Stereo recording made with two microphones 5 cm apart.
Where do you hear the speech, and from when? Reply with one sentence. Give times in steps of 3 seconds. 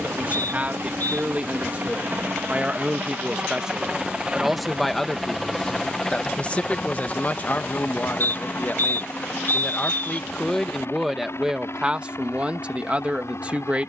You can hear the speech on the right from 0 s, in the centre from 3 s, on the left from 6 s, in the centre from 9 s and on the right from 12 s.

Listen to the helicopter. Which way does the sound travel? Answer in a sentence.
You can hear the helicopter travel towards the left.